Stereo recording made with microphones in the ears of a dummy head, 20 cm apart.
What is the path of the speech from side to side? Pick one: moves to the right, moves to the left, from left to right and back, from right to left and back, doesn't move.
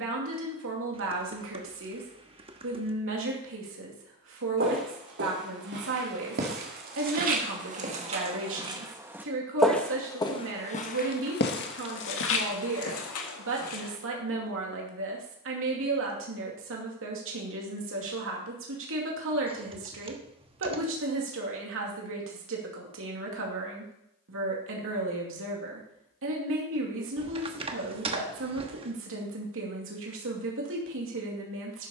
doesn't move.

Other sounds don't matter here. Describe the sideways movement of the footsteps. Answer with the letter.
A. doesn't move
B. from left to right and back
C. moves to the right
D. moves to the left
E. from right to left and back
D.